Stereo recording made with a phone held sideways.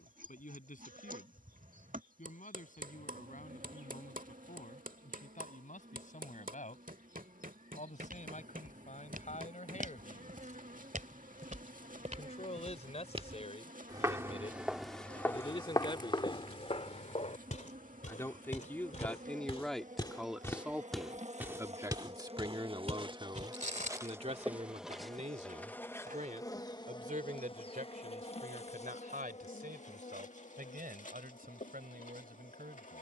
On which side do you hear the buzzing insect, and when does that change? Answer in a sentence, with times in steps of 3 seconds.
In this clip you hear the buzzing insect on the right from 0 s, in the centre from 24 s and on the left from 27 s.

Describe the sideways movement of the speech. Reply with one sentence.
In this clip you hear the speech travel towards the right.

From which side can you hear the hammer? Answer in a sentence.
You can hear the hammer on the right.